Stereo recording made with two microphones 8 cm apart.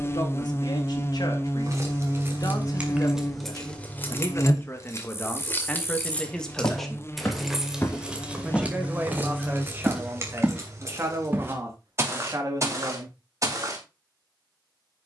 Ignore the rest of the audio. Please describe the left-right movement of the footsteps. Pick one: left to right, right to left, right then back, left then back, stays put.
left to right.